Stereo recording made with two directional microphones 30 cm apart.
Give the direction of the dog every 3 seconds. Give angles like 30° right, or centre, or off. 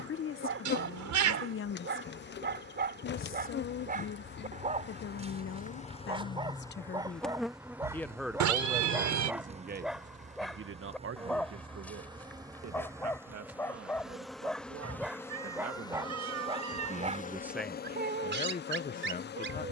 40° right, 20° right, 10° right, centre, 10° left, 10° right, 40° right.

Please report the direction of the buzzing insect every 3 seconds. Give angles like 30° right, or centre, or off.
40° left, 30° left, centre, 20° right, 10° right, 20° left, 30° left.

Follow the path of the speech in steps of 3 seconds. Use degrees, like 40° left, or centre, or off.
40° left, 40° left, 20° left, 40° right, 60° right, 30° right, 30° left.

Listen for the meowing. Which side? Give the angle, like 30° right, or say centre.
70° right.